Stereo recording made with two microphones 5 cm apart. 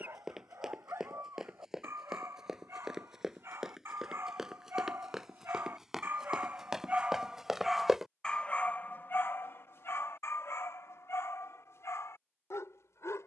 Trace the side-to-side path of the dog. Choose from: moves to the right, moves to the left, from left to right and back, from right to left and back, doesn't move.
moves to the left.